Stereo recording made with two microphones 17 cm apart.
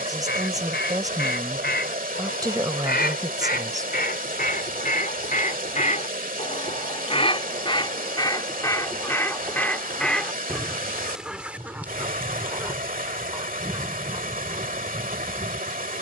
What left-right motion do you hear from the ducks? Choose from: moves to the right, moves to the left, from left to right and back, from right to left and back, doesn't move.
moves to the right.